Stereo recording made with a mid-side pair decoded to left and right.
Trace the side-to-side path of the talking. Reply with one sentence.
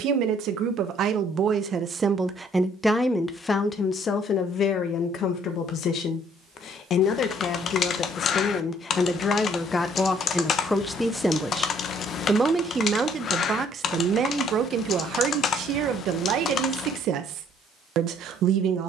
In this clip you hear the talking go left and come back.